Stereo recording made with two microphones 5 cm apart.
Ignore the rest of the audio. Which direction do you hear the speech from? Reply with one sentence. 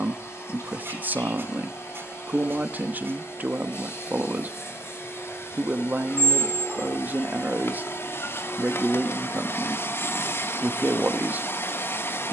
You can hear the speech on the right.